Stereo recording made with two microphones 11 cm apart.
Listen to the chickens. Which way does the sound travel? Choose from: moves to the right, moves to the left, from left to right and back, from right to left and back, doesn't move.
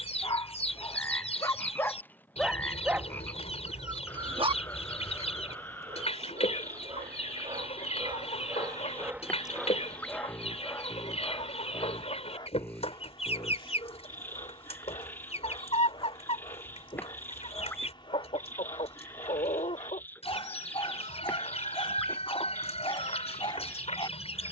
doesn't move.